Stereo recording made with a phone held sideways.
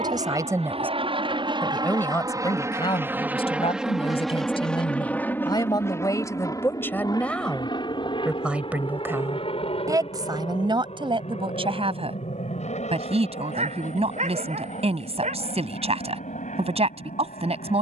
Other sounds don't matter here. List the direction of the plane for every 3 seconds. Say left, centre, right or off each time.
right, centre, left, left, left, left.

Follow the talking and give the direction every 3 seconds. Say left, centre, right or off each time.
centre, left, centre, right, right, right.